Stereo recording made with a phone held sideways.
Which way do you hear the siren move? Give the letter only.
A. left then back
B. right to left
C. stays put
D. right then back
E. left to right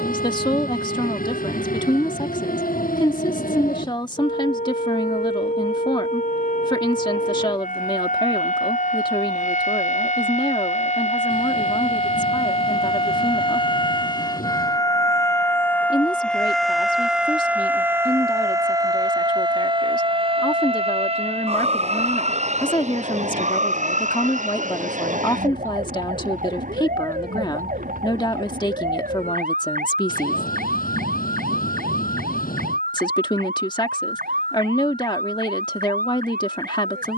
E.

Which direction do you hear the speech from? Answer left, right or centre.
left.